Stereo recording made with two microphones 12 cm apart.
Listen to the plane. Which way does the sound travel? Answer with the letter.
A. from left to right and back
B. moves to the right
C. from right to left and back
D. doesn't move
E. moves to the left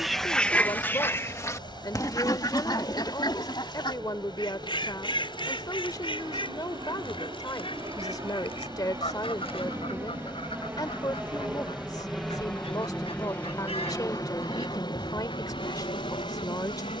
E.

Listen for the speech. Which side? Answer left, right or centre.
left.